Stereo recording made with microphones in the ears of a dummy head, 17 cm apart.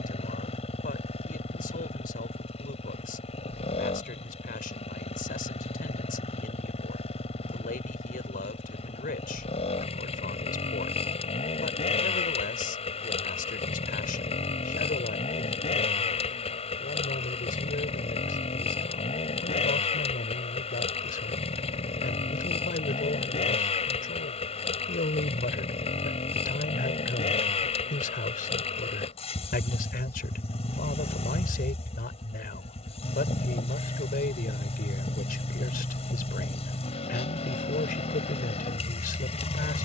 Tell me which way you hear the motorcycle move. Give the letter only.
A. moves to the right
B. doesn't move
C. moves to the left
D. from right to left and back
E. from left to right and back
B.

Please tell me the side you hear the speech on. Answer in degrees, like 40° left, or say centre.
50° left.